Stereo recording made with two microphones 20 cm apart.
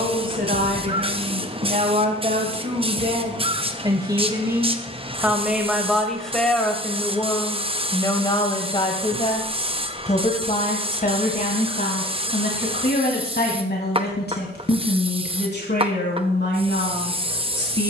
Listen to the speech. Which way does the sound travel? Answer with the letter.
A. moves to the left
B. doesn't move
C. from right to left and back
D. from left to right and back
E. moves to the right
A.